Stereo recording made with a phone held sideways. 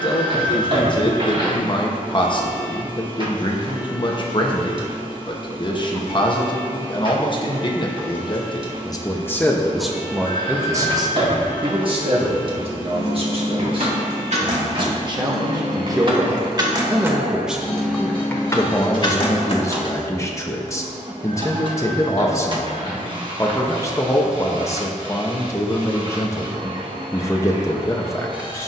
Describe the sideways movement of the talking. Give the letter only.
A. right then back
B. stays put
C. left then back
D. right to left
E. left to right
A.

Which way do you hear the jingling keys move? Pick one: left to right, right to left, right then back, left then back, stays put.
right to left.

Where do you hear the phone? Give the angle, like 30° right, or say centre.
40° right.